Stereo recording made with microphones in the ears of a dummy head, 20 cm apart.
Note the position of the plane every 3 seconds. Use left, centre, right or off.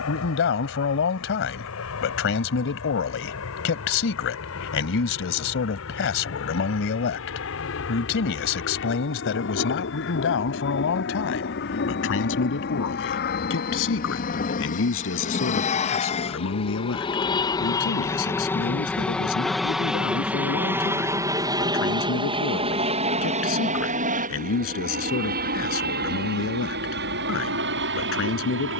left, left, left, left, left, left, centre, right, right, right.